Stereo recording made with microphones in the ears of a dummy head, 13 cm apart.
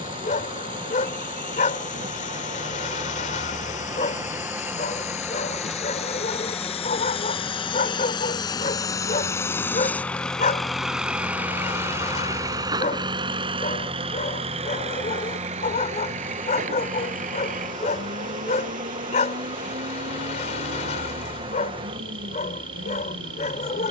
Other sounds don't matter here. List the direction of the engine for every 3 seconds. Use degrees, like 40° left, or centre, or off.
70° left, 60° left, 40° left, centre, 40° right, 60° right, 70° right, 80° right.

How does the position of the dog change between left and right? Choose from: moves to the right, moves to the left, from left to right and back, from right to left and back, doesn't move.
doesn't move.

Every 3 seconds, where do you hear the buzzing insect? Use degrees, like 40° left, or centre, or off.
40° right, 20° right, 10° left, centre, 40° right, 40° right, 40° right, 40° right.